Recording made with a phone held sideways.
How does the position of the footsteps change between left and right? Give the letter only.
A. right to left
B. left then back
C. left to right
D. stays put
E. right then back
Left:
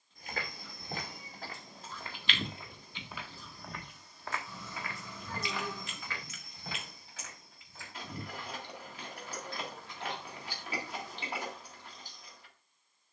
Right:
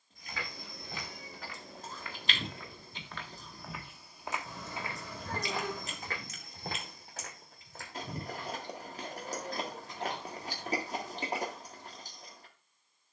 C.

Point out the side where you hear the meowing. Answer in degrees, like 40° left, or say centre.
70° right.